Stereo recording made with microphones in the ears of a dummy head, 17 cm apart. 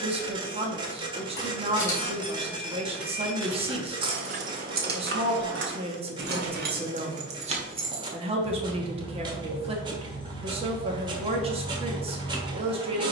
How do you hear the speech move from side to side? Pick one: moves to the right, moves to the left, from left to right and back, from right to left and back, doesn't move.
doesn't move.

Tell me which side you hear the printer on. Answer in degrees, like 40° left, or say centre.
30° right.